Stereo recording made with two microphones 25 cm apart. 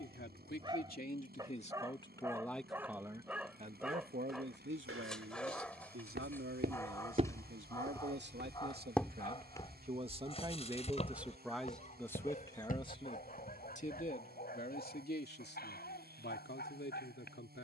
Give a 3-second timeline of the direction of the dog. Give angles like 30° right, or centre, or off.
10° right, centre, 10° left, 30° left, 40° left, 40° left.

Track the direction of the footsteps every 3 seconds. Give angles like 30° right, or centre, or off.
off, 60° right, 20° right, 20° left, 40° left, off.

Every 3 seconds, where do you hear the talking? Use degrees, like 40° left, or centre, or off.
30° left, 50° right, 60° right, 20° right, 30° left, 50° left.